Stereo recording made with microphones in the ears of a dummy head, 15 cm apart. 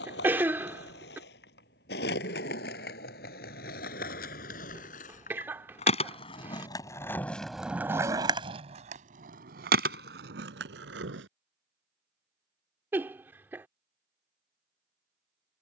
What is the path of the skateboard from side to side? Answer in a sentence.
In this clip you hear the skateboard move from left to right.